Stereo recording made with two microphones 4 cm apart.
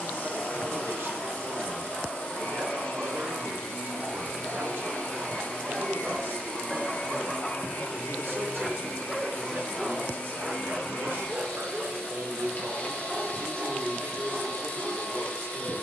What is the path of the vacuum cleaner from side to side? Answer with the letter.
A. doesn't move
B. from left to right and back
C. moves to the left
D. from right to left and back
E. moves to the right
A.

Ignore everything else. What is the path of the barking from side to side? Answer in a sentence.
In this clip you hear the barking go left and come back.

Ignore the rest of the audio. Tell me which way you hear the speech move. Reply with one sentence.
You can hear the speech stay in one place.